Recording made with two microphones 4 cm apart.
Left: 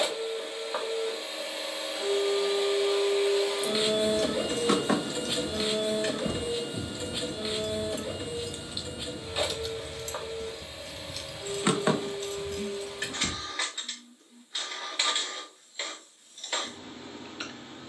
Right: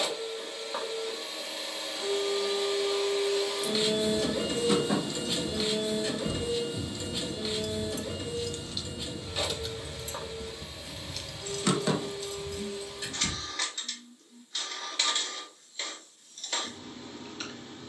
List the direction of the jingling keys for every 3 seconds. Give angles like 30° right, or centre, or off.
off, 70° left, 40° left, centre, 60° left, off.